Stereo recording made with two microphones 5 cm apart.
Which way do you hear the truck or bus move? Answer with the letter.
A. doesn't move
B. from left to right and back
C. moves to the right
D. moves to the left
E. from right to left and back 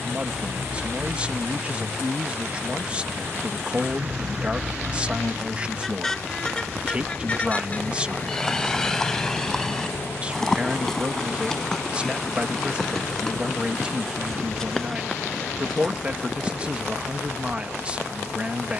D.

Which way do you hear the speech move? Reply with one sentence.
In this clip you hear the speech stay in one place.